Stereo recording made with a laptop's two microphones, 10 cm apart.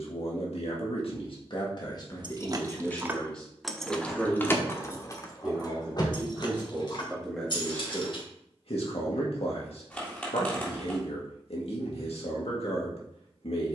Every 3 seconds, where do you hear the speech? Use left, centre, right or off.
left, centre, centre, left, left.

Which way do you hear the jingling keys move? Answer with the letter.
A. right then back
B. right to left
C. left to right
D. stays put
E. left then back
B.